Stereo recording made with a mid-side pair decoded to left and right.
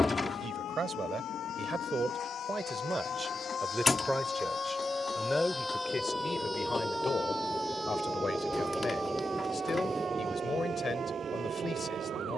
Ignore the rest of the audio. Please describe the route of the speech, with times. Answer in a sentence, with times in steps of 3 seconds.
You can hear the speech on the right from 0 s, in the centre from 3 s and on the left from 6 s.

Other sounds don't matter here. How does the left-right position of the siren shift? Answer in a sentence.
You can hear the siren move to the right.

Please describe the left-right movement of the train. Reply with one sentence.
In this clip you hear the train move from left to right.